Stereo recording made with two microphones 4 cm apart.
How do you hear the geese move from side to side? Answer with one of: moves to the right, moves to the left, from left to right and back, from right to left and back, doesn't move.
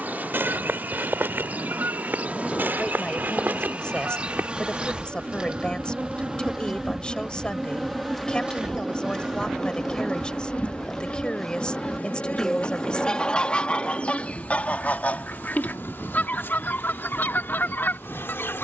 moves to the left.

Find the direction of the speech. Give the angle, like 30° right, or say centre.
20° left.